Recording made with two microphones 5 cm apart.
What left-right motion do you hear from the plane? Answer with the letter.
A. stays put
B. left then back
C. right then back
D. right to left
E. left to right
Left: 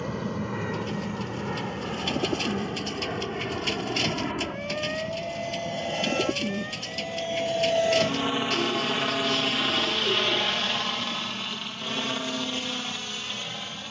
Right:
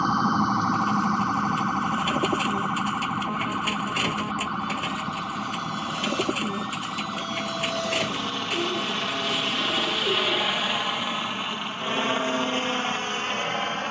E.